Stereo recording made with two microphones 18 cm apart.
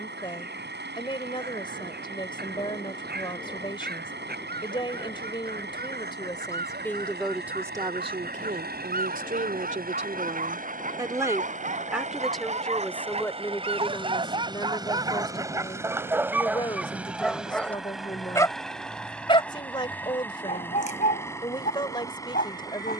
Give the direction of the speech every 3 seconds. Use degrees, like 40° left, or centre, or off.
30° left, 30° left, 10° right, 30° right, 10° left, 30° left, 30° left, 30° left.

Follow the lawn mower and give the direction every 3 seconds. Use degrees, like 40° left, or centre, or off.
80° right, 80° right, 70° right, 50° right, 30° right, 10° right, 10° left, 20° left.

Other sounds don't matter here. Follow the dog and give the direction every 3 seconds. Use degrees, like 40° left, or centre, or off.
60° right, 60° right, 60° right, 50° right, 40° right, 10° right, 30° left, 50° left.